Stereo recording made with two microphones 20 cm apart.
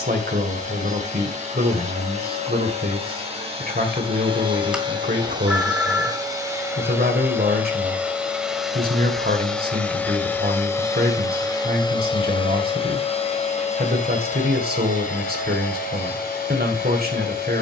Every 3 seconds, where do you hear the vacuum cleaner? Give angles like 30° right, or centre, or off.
40° right, 30° right, 10° right, 10° left, 40° left, 50° left.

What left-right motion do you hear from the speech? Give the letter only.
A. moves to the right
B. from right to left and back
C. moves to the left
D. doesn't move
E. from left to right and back
D.